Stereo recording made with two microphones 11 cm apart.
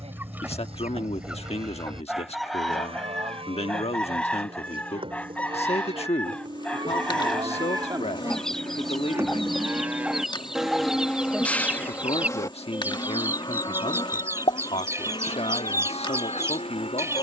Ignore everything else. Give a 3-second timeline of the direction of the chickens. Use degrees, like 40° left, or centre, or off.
10° right, 10° left, 10° left, centre, 20° right, 30° right.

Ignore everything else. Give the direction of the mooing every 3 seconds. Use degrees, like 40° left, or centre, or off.
60° right, 60° right, 40° right, centre, 40° left, 70° left.